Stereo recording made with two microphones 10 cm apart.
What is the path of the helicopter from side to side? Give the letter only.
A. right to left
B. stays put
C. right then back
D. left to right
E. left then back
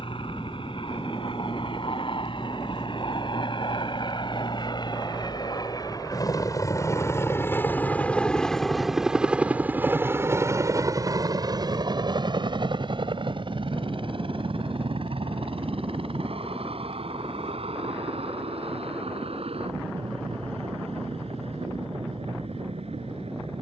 D.